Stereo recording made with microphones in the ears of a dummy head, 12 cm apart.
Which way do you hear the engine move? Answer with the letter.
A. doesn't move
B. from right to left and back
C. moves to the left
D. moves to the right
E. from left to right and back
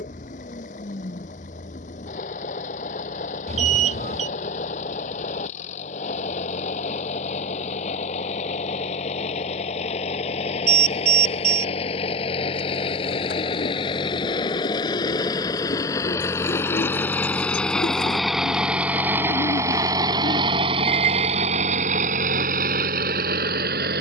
D.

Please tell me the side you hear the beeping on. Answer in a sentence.
You can hear the beeping on the right.